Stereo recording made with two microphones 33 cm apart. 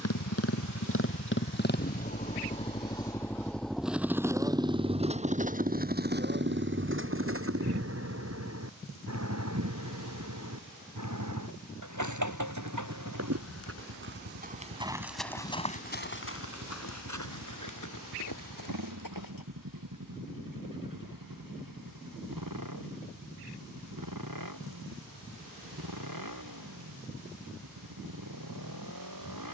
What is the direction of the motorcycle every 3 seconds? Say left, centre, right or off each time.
left, centre, right, right, right, right, right, right, right, right.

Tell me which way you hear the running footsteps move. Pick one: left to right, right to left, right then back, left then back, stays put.
right to left.